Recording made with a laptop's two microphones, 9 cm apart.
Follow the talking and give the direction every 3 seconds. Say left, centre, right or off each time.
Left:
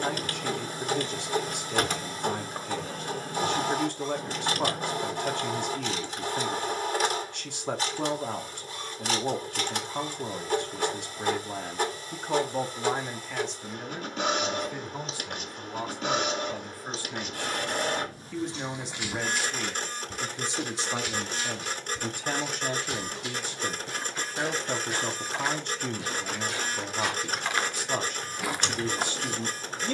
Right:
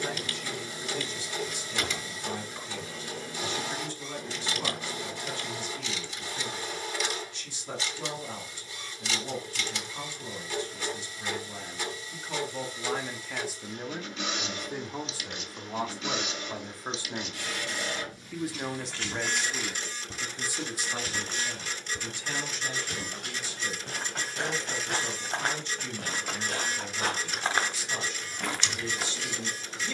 left, left, left, left, centre, right, centre, left, left, left.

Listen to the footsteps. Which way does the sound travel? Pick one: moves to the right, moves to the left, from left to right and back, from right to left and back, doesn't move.
from left to right and back.